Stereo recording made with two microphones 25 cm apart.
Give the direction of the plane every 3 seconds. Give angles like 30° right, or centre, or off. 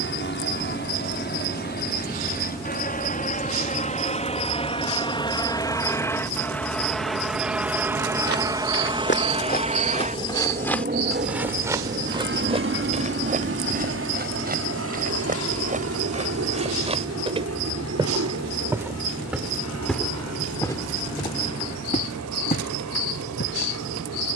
40° left, 20° left, centre, 30° right, 50° right, 60° right, 70° right, 70° right.